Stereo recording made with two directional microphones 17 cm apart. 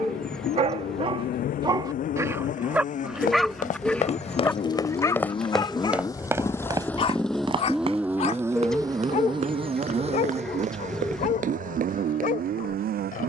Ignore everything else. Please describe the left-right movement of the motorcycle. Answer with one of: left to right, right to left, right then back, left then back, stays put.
left to right.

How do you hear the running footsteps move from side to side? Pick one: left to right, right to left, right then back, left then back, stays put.
left to right.